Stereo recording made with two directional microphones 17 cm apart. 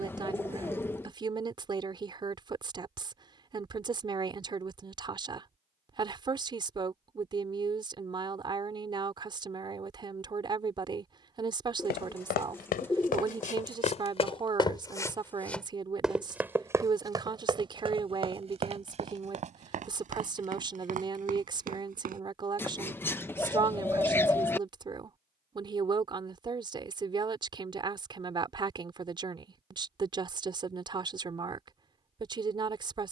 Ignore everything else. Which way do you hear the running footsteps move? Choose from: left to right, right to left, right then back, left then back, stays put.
left to right.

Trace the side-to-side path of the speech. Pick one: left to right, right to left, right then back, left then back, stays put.
stays put.